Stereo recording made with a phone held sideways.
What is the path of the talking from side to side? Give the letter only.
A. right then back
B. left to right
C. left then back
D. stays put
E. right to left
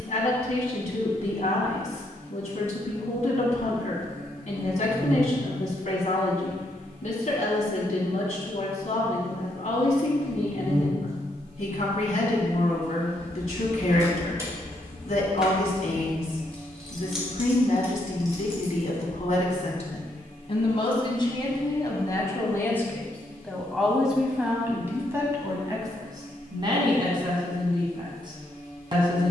B.